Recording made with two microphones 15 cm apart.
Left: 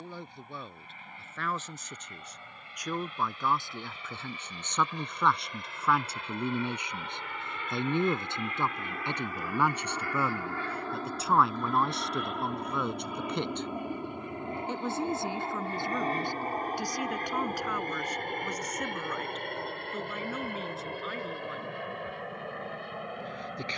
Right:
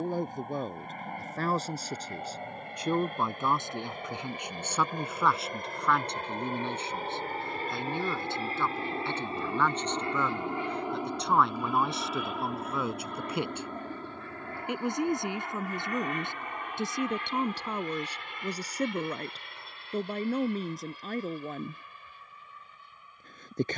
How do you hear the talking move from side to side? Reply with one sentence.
You can hear the talking move from right to left and back again.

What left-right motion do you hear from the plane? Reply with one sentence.
In this clip you hear the plane move from right to left.